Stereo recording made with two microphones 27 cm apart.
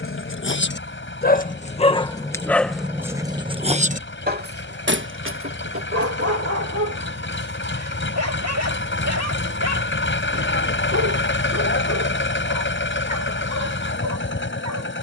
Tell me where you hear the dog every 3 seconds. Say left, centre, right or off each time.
left, right, right, right, right.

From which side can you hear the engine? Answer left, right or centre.
left.